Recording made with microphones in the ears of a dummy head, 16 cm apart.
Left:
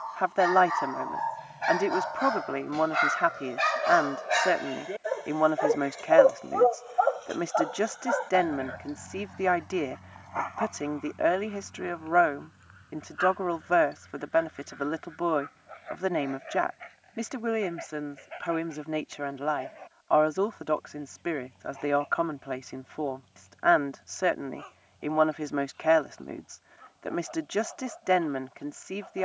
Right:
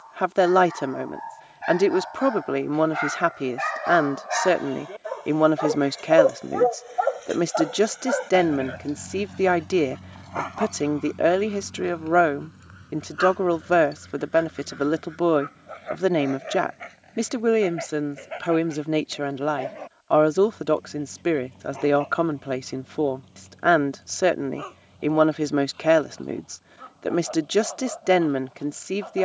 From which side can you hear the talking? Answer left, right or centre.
right.